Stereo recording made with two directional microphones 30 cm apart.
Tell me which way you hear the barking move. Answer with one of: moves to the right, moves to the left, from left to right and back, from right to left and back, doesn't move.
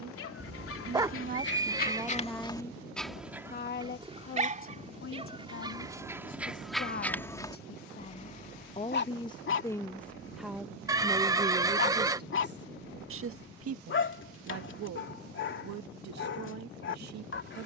from left to right and back.